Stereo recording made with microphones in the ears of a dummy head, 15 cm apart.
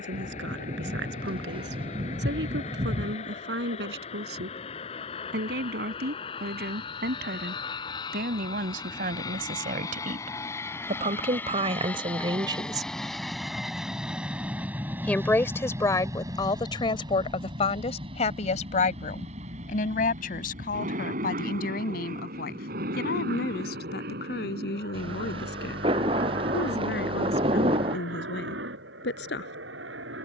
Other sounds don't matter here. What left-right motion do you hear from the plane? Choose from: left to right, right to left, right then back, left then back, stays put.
left to right.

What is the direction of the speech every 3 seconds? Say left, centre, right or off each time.
right, right, right, right, right, left, left, left, left, left.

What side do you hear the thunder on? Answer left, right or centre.
right.